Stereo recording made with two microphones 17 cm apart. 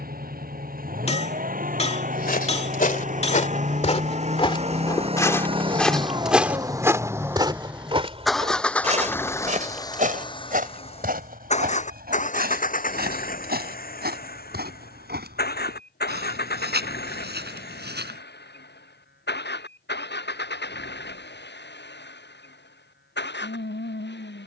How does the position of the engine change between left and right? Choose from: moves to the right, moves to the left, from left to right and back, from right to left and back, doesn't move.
moves to the left.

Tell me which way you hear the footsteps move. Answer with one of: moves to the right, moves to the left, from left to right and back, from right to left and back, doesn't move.
moves to the right.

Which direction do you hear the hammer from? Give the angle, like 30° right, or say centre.
40° left.